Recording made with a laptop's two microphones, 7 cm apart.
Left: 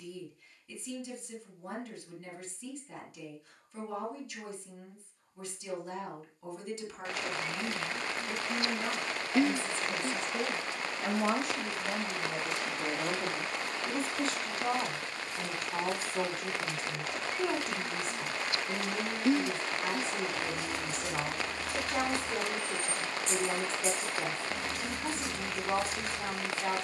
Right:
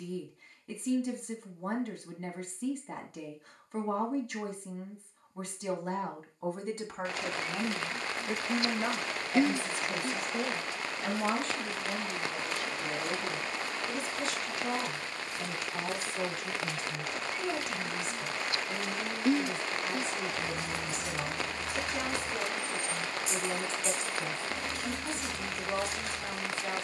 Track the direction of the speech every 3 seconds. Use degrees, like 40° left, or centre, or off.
50° right, 50° right, 40° right, centre, 30° left, 50° left, 50° left, 50° left, 50° left.